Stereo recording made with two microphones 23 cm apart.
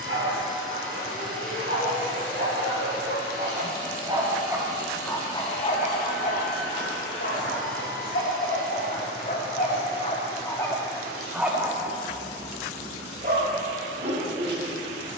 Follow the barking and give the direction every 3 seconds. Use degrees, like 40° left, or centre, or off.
50° right, 10° right, 50° left, 20° left, 40° right.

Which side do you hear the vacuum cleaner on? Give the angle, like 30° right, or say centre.
centre.